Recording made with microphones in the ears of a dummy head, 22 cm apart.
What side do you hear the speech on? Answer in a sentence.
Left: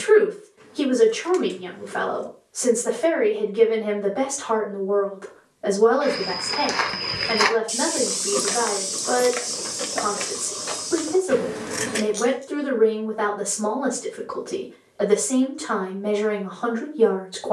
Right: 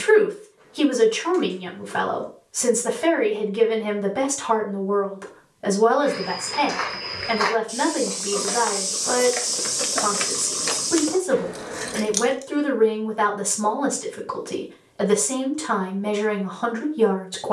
In this clip you hear the speech on the right.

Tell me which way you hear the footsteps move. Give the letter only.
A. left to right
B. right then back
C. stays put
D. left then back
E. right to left
A.